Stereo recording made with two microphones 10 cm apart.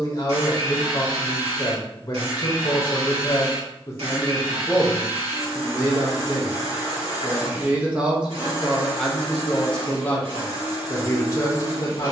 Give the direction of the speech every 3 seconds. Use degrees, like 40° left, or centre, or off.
40° left, 10° left, 20° right, 20° left.